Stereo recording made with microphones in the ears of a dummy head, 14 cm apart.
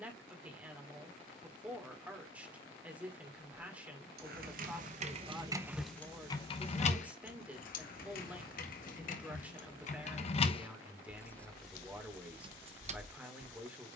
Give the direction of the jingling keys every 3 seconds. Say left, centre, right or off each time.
off, right, left, left, right.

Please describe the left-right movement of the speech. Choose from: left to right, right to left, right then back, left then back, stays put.
stays put.